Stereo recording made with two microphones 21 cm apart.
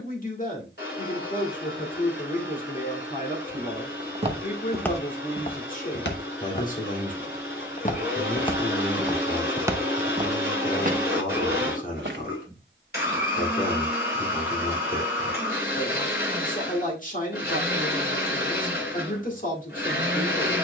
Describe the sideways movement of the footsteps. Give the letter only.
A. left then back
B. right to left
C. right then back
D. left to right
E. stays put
A.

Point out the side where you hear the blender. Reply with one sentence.
You can hear the blender on the left.